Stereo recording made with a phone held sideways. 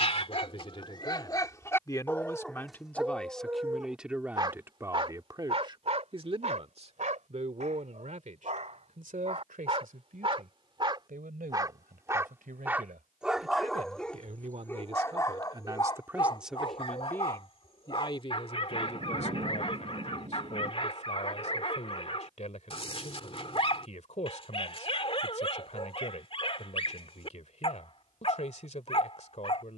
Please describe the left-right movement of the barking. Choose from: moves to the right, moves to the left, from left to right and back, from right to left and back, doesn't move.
from left to right and back.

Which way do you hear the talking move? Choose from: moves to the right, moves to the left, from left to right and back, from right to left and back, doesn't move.
from left to right and back.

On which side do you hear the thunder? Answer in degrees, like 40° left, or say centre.
50° right.